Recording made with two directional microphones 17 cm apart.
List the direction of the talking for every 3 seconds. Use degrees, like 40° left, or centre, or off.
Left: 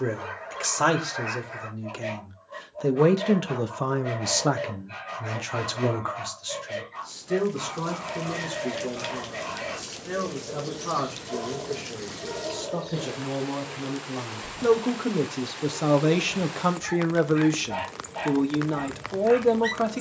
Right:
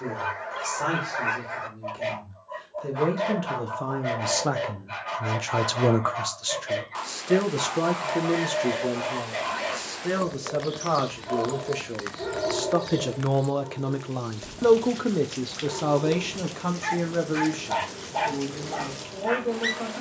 60° left, 10° left, 50° right, 60° right, 40° right, 20° left, 60° left.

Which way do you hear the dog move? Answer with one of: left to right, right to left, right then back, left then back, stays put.
stays put.